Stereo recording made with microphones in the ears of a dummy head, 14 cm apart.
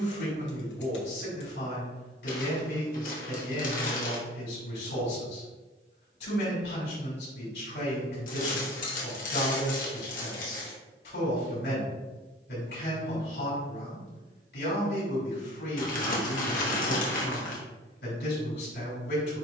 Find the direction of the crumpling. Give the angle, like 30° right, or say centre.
50° left.